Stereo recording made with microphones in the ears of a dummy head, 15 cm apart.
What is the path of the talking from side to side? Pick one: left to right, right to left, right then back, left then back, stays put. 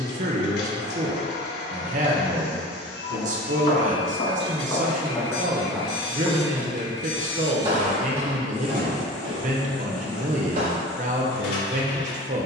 stays put.